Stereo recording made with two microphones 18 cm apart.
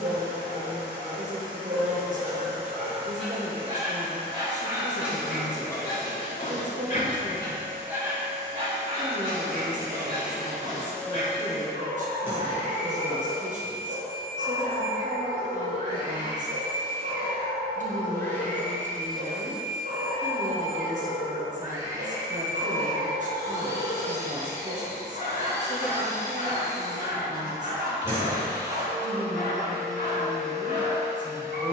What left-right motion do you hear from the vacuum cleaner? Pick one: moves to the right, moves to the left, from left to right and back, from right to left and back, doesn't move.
from right to left and back.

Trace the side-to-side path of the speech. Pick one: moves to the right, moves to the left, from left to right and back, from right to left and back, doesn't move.
doesn't move.